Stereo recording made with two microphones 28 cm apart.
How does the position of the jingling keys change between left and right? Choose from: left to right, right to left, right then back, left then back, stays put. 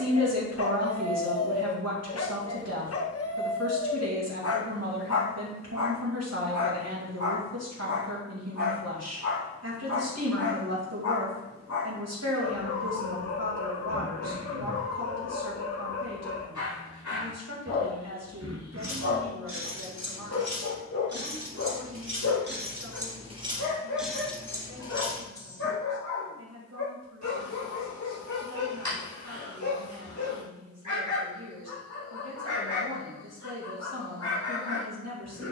right to left.